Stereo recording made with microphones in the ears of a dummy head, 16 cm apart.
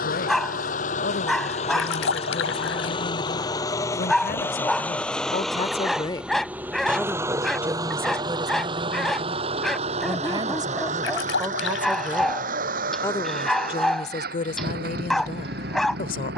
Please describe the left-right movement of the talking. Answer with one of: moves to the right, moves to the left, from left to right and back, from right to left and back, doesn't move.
from left to right and back.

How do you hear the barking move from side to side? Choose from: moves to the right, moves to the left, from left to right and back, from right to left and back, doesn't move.
doesn't move.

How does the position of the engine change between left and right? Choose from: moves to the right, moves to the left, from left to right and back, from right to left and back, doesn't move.
moves to the right.